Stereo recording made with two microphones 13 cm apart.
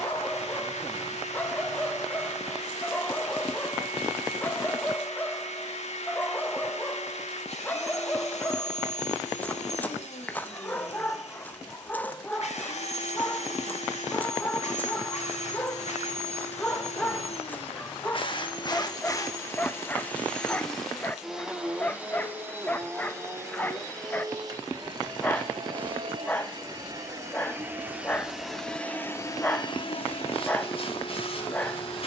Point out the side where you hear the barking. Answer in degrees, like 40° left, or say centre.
10° left.